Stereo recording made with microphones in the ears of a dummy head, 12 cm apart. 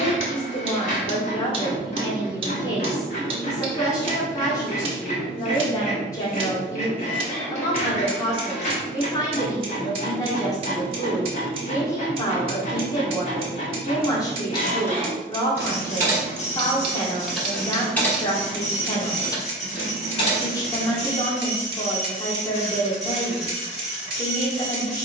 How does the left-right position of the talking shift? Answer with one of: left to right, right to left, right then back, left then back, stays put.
stays put.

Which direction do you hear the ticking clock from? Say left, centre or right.
right.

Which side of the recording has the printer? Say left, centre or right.
left.